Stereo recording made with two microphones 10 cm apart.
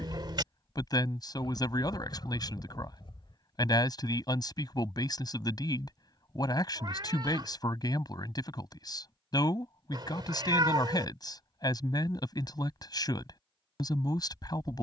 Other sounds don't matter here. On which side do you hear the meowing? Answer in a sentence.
In this clip you hear the meowing on the right.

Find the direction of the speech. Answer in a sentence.
You can hear the speech on the left.